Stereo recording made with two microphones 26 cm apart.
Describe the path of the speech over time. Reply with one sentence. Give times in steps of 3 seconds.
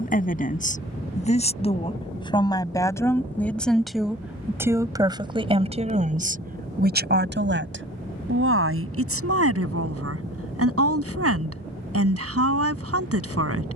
In this clip you hear the speech on the left from 0 s, in the centre from 3 s and on the right from 6 s.